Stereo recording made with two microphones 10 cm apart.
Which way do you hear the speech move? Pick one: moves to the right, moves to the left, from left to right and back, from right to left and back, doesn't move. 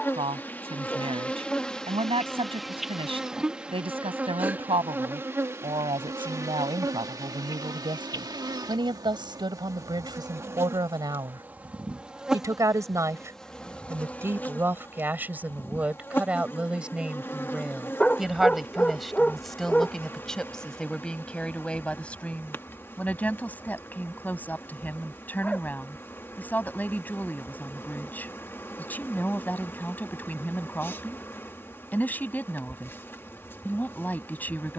moves to the left.